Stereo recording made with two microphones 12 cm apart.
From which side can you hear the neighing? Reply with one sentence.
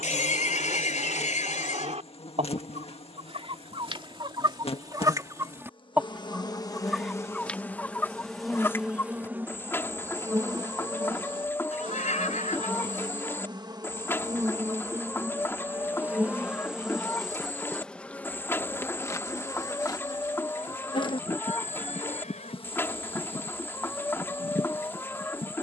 You can hear the neighing on the left.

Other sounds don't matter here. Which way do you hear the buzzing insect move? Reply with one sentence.
In this clip you hear the buzzing insect go right and come back.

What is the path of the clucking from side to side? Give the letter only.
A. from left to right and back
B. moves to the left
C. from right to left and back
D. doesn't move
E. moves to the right
B.